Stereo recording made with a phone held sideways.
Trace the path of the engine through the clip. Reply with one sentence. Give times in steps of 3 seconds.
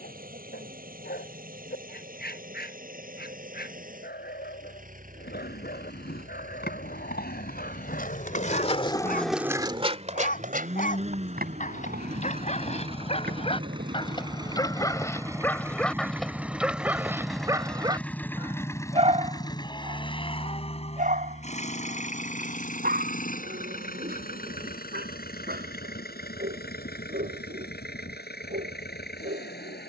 In this clip you hear the engine on the right from 0 s, in the centre from 15 s and on the left from 18 s.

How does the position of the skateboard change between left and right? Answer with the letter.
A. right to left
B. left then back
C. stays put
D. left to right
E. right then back
D.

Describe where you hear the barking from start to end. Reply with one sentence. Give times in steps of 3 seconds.
You can hear the barking on the left from 0 s, in the centre from 15 s and on the right from 18 s.